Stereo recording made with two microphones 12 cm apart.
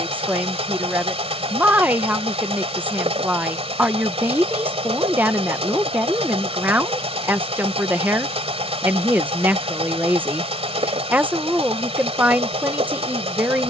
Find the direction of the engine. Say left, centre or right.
right.